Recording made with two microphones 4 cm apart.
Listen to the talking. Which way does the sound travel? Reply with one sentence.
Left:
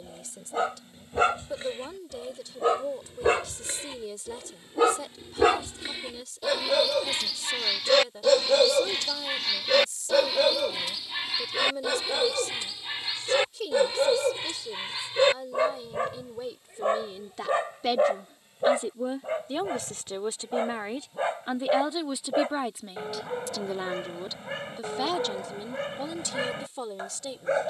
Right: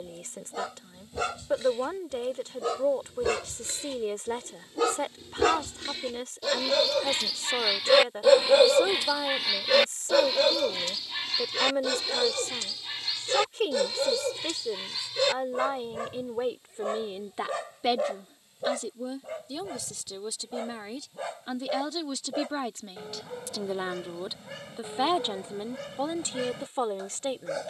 In this clip you hear the talking move from right to left and back again.